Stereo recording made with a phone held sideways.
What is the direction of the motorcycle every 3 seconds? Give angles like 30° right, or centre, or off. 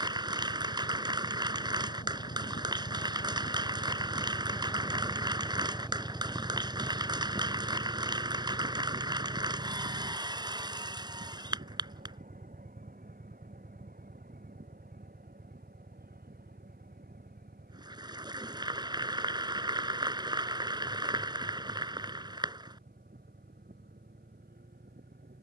60° left, 20° left, 30° right, 50° right, 60° right, 70° right, 70° right, 70° right, 70° right.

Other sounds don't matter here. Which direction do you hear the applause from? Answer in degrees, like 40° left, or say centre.
30° right.